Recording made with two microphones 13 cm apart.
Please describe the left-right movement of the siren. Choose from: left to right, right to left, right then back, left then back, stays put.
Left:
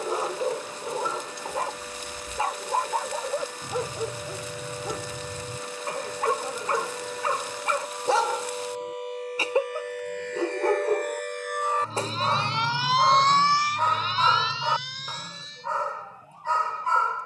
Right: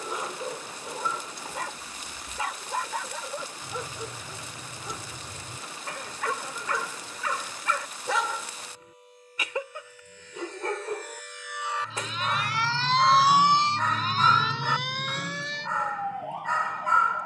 left to right.